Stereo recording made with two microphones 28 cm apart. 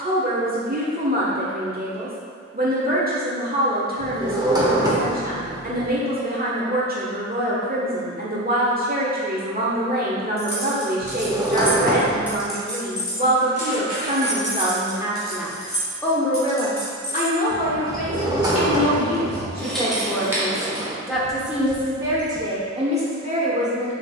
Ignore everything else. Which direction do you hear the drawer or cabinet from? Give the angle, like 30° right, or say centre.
10° right.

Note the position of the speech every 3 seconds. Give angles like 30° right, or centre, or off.
30° right, 30° right, 30° right, 30° right, 30° right, 20° left, 20° left, 20° right.